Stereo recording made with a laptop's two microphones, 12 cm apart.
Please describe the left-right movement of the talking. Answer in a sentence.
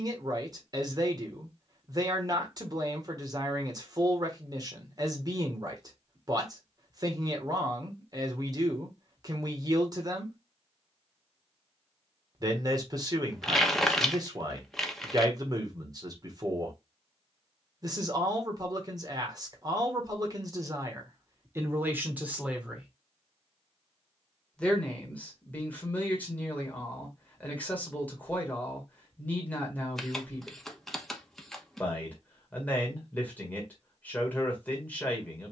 In this clip you hear the talking go from the right side to the left.